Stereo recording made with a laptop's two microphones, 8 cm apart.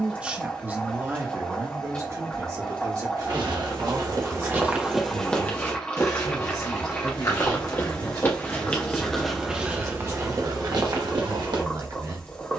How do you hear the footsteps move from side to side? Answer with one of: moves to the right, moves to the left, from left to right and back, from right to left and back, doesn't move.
from right to left and back.